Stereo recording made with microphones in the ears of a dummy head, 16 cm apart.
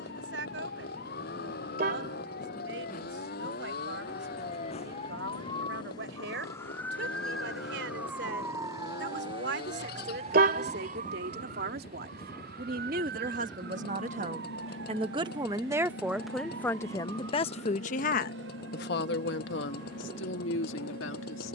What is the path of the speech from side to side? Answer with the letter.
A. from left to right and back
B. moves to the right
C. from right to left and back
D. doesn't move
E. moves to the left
E.